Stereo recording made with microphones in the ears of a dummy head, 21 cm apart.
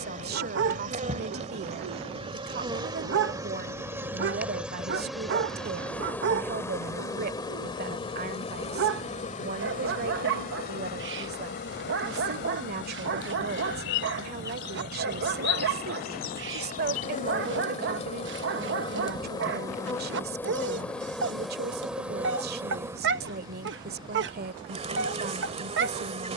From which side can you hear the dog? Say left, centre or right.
right.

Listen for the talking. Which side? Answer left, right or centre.
right.